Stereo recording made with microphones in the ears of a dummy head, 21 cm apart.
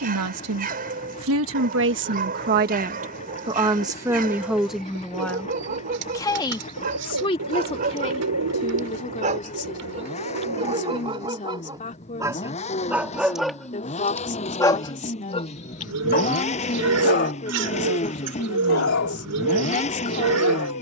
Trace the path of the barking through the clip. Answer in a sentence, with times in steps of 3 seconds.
In this clip you hear the barking on the right from 0 s, in the centre from 12 s and on the left from 15 s.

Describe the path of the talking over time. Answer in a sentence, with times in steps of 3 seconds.
You can hear the talking on the right from 0 s, in the centre from 3 s and on the left from 6 s.